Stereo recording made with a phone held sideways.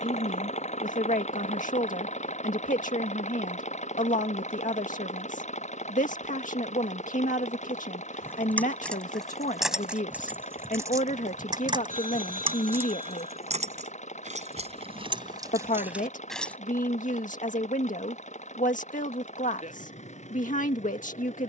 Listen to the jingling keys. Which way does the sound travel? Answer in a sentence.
In this clip you hear the jingling keys move from left to right and back again.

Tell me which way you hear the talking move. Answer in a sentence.
You can hear the talking stay in one place.